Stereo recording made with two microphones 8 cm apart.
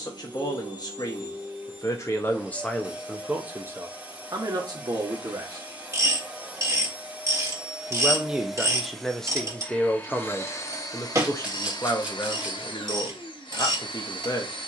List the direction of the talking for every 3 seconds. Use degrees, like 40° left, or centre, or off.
40° left, 40° right, 10° right, 20° left, 40° left.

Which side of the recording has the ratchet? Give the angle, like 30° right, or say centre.
40° right.